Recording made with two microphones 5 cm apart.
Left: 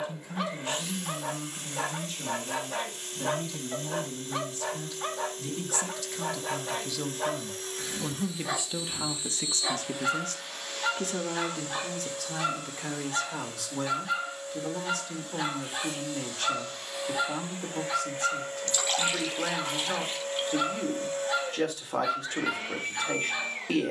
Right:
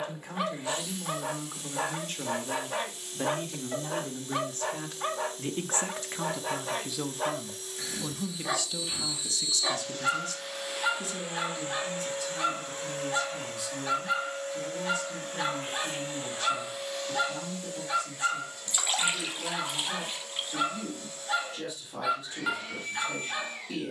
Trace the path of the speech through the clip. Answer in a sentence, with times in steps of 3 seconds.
You can hear the speech on the right from 0 s, in the centre from 6 s and on the left from 9 s.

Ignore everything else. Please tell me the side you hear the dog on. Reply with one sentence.
In this clip you hear the dog in the centre.